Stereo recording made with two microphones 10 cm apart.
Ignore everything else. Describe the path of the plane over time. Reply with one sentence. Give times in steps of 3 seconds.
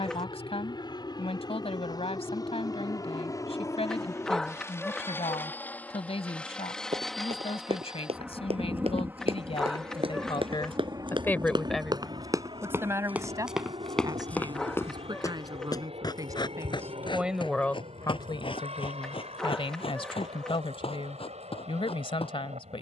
You can hear the plane on the left from 0 s, in the centre from 6 s and on the right from 9 s.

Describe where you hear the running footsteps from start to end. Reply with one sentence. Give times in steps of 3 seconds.
You can hear the running footsteps not at all from 0 s, on the right from 6 s, in the centre from 12 s and on the left from 15 s.